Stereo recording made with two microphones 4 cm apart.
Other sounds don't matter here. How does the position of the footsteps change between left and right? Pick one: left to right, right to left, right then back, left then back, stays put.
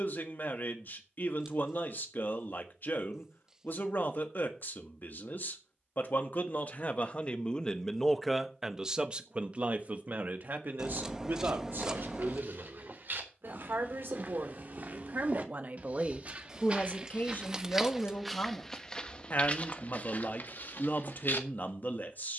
right to left.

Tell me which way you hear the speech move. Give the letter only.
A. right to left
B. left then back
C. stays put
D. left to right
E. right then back
E.